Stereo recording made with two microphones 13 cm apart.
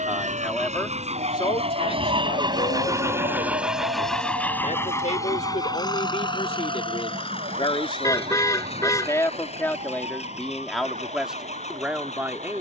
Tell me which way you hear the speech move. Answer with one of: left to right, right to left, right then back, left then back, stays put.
left then back.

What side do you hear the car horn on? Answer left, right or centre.
left.